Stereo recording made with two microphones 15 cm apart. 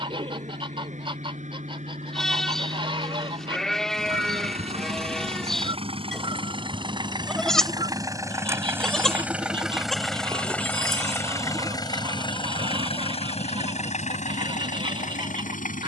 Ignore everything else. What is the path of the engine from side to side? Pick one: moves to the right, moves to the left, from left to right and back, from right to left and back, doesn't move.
moves to the left.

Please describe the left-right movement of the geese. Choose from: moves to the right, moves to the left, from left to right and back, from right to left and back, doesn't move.
doesn't move.